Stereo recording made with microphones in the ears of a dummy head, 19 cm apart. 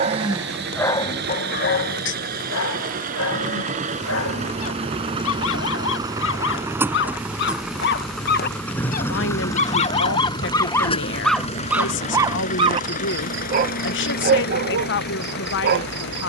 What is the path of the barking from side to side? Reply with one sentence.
In this clip you hear the barking move from right to left and back again.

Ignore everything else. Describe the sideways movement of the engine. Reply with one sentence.
In this clip you hear the engine go from the right side to the left.